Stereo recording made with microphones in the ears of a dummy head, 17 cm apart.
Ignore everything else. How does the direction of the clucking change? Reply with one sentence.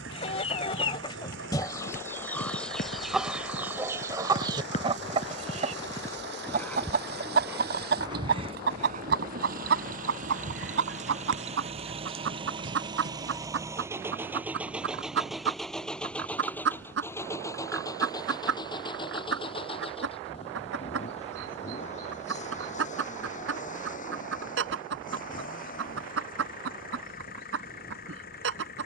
You can hear the clucking go from the left side to the right.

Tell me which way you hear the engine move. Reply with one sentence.
You can hear the engine go from the right side to the left.